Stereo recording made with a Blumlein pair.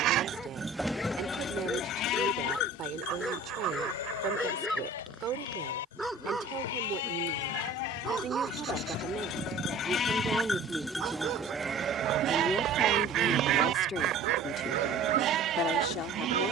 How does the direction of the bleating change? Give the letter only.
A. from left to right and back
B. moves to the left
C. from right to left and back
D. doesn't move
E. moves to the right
C.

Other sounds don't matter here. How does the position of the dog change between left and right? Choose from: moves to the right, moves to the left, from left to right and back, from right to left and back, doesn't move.
moves to the right.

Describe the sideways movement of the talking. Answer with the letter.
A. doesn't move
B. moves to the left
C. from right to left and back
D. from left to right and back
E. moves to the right
B.